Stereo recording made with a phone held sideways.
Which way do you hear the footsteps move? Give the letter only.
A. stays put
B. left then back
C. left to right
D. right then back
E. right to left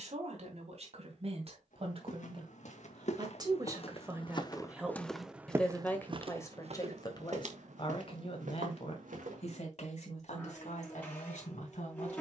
C.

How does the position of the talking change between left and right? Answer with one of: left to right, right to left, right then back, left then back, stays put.
right to left.